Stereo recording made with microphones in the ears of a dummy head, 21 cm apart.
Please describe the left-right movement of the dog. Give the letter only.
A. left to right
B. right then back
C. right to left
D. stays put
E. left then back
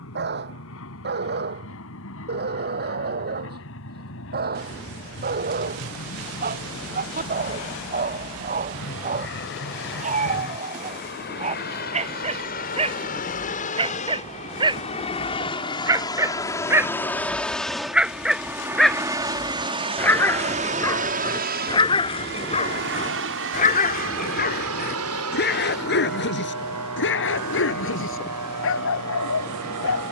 C.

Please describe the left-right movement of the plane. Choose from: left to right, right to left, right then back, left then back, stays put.
left to right.